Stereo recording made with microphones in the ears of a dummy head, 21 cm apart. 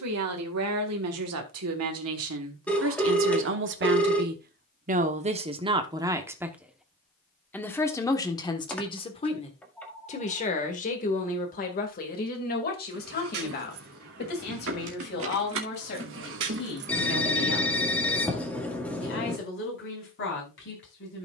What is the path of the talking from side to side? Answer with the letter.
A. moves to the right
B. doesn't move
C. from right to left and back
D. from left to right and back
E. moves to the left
E.